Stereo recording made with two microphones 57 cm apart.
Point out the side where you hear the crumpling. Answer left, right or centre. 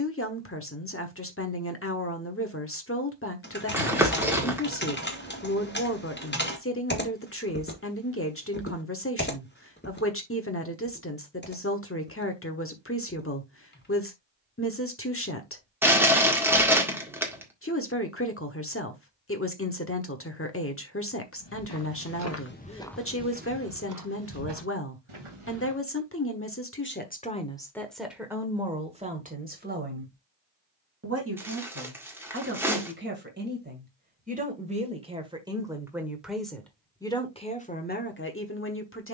centre.